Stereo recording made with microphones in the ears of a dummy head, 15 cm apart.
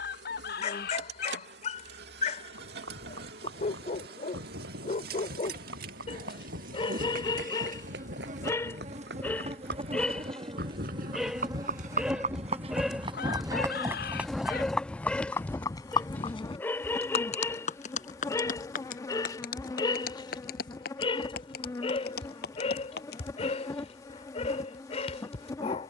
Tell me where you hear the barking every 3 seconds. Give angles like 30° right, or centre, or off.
40° left, 40° left, 30° left, centre, centre, 10° left, 20° left, 40° left, 40° left.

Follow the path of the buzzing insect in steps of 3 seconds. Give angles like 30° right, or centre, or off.
70° right, 70° right, 50° right, 30° right, centre, 20° left, 20° left, 20° left, 20° left.